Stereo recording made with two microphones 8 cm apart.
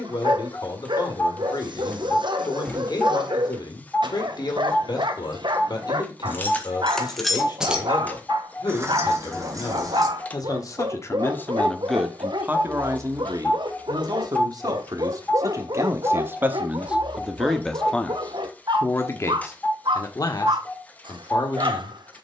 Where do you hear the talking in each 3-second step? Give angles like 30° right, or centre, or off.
60° left, 60° left, 60° left, 40° left, 40° right, 20° right, 40° left, 60° left.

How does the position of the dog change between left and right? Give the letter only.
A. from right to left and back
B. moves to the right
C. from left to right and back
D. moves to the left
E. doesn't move
E.